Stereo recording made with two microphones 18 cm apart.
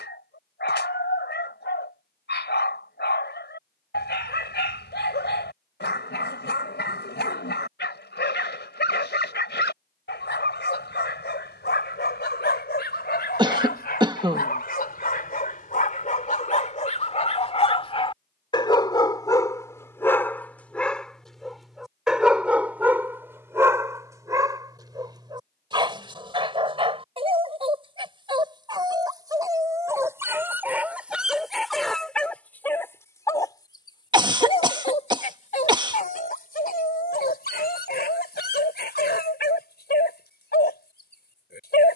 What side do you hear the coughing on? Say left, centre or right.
right.